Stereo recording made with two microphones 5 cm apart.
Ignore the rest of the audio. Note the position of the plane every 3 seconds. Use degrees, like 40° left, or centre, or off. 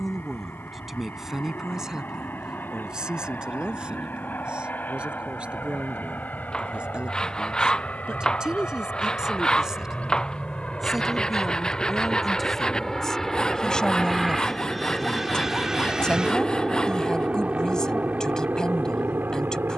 50° left, 40° left, 40° left, 20° left, 10° left, 20° right, 30° right.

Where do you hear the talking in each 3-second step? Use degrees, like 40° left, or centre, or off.
10° right, 20° right, 20° right, 10° right, 10° left, 20° left, 20° left.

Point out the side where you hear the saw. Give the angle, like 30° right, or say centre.
10° left.